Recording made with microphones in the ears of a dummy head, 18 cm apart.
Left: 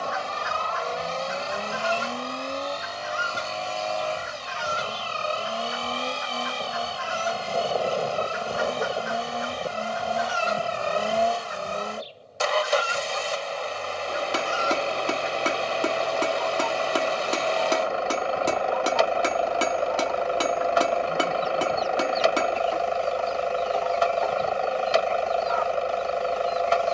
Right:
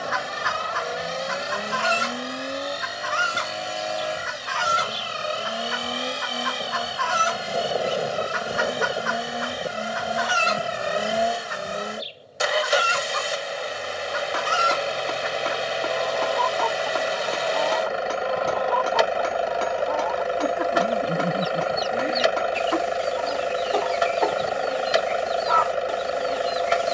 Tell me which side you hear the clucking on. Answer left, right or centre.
right.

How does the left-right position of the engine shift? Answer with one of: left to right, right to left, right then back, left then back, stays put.
stays put.